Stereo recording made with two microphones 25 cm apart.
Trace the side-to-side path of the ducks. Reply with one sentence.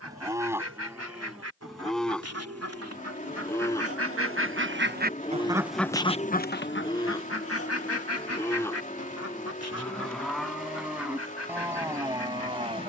You can hear the ducks move from right to left.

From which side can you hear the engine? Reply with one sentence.
In this clip you hear the engine on the left.